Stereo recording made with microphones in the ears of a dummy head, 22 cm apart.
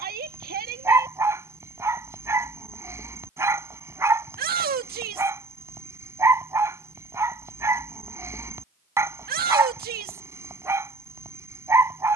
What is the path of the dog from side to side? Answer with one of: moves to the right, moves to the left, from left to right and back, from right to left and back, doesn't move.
doesn't move.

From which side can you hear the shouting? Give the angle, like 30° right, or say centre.
40° right.